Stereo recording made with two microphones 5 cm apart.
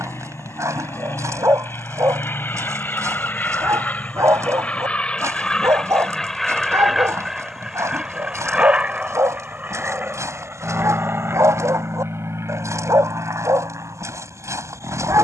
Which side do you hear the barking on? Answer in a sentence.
You can hear the barking on the right.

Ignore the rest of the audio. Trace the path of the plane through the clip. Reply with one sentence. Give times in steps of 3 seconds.
You can hear the plane on the left from 0 s, in the centre from 6 s and on the right from 9 s.